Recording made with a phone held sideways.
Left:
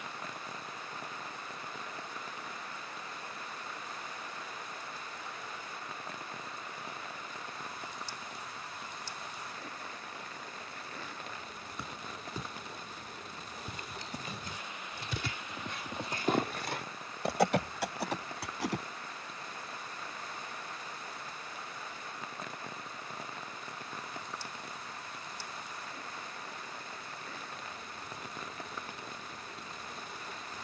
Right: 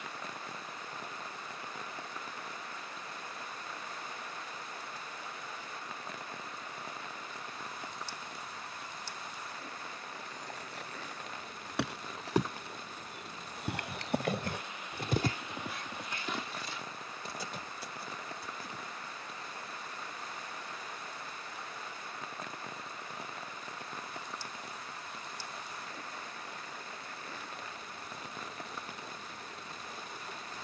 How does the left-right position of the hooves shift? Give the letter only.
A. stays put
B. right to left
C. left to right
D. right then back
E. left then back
B.